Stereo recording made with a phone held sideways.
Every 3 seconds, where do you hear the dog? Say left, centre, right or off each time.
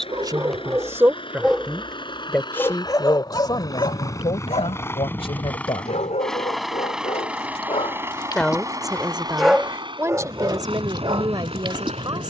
centre, left, left, right.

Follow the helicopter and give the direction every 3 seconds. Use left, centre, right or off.
left, left, centre, right.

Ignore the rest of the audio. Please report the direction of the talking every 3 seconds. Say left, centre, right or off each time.
centre, left, centre, right.